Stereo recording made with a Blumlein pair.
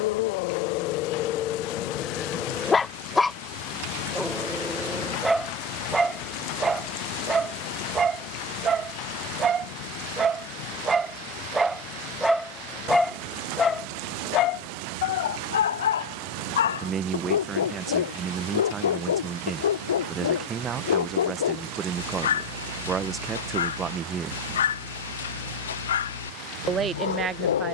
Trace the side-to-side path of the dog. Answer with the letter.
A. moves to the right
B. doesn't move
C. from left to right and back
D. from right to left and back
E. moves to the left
C.